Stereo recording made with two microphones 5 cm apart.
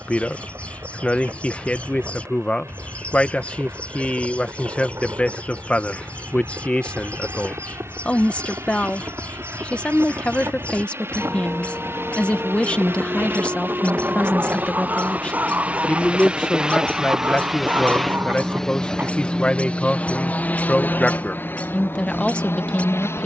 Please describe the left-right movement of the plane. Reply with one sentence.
You can hear the plane go from the right side to the left.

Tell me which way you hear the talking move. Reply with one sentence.
In this clip you hear the talking stay in one place.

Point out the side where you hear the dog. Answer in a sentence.
You can hear the dog on the right.